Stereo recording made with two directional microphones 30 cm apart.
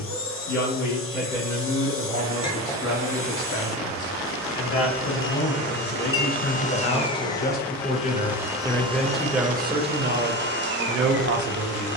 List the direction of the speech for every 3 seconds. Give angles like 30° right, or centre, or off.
60° left, 50° left, 30° left, 30° right.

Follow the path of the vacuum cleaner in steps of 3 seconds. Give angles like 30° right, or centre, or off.
40° left, 40° left, 10° left, 30° right.